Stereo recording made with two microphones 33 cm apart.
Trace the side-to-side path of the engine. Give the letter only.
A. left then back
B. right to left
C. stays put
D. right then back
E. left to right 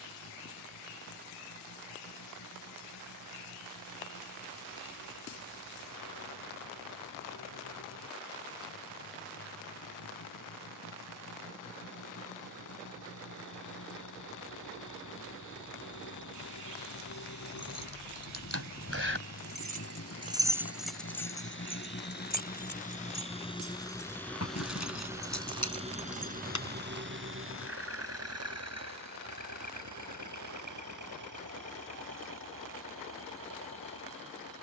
E.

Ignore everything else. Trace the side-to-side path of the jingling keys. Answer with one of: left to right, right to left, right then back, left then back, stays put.
right to left.